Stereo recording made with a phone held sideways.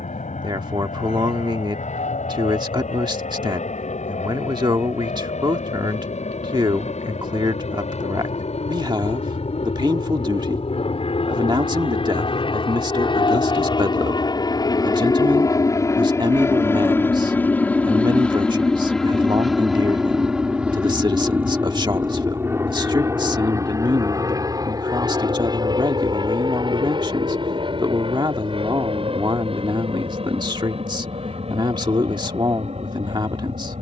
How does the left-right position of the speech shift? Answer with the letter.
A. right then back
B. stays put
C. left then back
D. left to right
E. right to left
B.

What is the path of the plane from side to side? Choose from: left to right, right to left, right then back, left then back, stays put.
left to right.